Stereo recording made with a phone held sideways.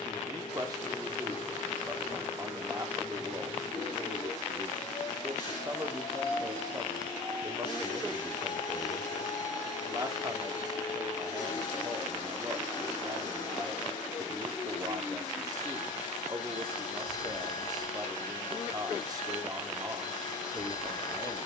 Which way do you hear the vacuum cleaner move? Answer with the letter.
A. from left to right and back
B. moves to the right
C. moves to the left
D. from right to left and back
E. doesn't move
E.